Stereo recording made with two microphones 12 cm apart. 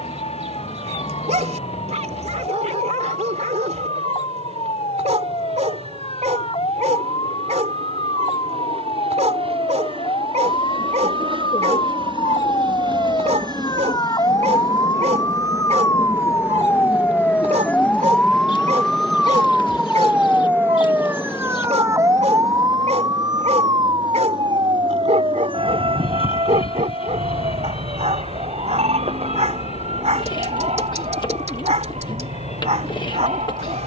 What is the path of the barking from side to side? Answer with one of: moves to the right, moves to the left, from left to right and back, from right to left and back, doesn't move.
doesn't move.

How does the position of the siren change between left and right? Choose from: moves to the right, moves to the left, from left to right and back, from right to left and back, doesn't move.
moves to the right.